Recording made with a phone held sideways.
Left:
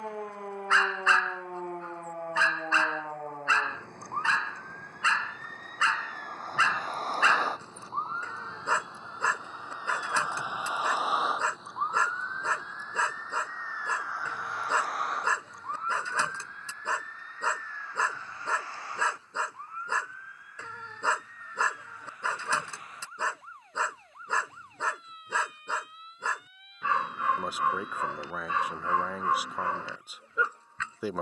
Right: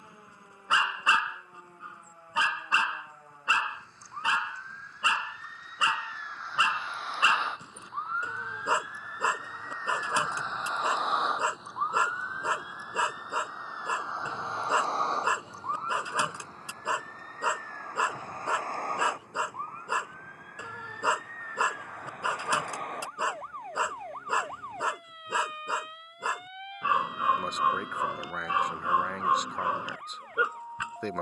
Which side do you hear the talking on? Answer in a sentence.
You can hear the talking in the centre.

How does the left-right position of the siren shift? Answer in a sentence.
You can hear the siren go from the left side to the right.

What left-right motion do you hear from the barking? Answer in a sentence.
In this clip you hear the barking stay in one place.